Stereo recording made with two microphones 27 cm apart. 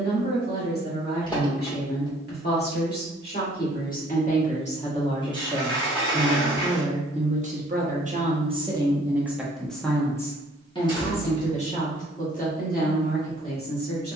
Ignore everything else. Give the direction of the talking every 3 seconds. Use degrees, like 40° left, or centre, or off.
40° left, 30° left, 20° right, 10° left, 30° left.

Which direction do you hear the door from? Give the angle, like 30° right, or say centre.
20° left.